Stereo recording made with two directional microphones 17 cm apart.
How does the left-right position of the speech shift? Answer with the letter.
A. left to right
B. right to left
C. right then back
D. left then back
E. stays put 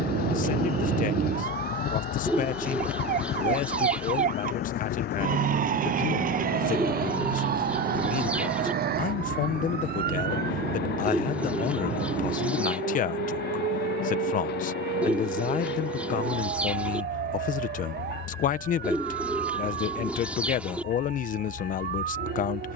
E.